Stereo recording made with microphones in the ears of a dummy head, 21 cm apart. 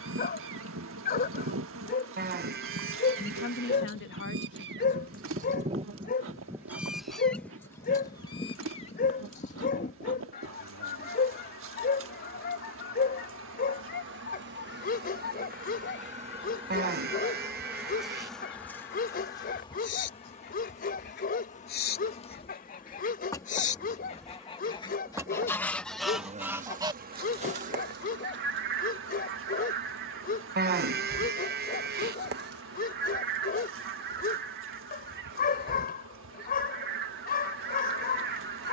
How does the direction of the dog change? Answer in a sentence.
In this clip you hear the dog stay put.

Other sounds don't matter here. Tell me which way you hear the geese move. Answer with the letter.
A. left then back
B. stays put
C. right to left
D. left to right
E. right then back
A.